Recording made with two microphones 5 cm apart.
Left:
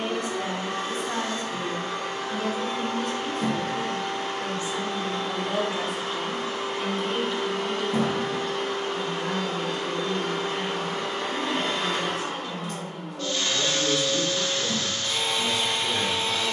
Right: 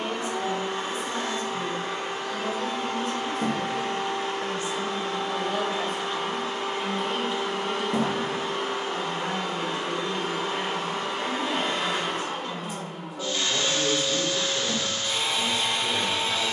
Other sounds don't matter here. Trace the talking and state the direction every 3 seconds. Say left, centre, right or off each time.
left, left, centre, right, right, right.